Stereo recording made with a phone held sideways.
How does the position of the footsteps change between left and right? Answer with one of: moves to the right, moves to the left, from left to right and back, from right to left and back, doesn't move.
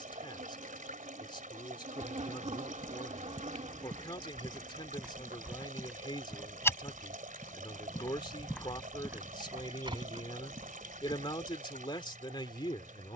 from right to left and back.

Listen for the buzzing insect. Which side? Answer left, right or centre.
right.